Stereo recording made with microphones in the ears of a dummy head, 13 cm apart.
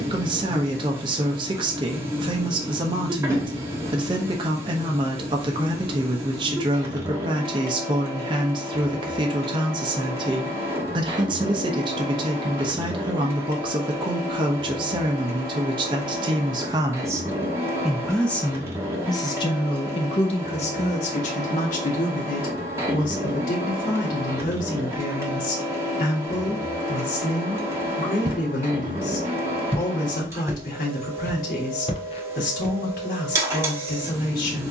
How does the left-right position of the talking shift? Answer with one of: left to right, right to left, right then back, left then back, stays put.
right to left.